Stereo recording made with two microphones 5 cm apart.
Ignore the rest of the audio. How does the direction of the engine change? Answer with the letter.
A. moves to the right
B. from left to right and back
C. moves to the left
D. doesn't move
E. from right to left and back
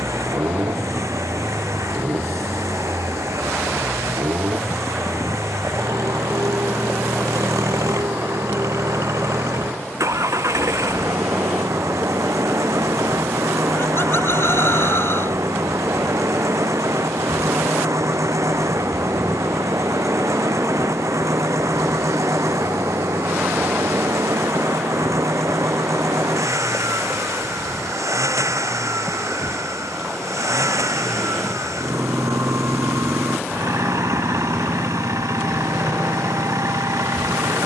D.